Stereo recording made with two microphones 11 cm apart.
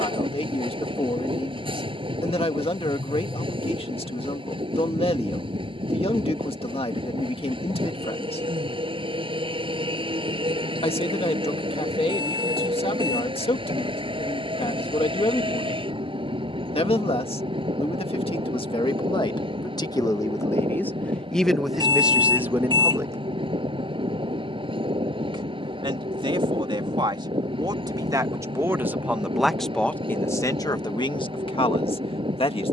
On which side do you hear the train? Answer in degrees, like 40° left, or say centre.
50° right.